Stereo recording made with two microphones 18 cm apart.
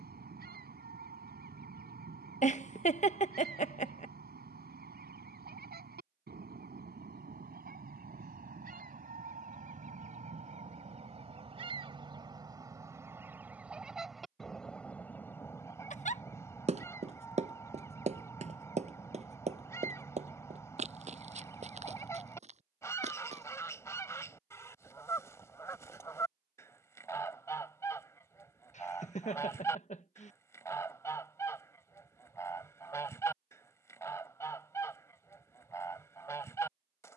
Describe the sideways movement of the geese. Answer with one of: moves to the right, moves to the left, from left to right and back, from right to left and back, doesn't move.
moves to the left.